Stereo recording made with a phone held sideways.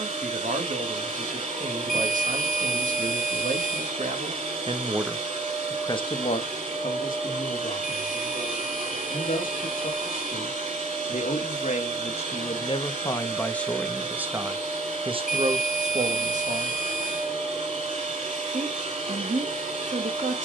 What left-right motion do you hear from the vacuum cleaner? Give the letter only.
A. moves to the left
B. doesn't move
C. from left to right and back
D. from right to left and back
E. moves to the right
B.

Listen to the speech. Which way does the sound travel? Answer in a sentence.
In this clip you hear the speech move from right to left and back again.